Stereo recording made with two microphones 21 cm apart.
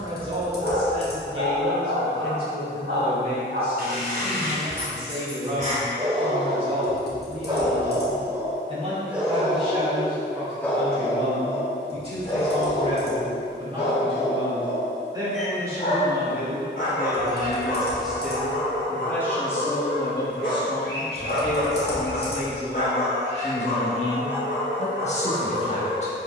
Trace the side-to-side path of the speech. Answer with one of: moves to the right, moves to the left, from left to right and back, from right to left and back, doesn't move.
moves to the left.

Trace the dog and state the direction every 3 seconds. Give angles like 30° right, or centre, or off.
60° right, 40° right, 20° right, 10° left, 30° left, 40° left, 50° left, 60° left, 60° left.